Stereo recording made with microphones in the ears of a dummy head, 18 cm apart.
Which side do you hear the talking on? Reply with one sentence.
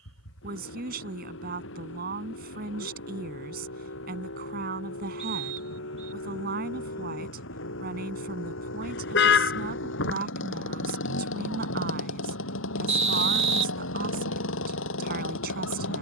You can hear the talking on the right.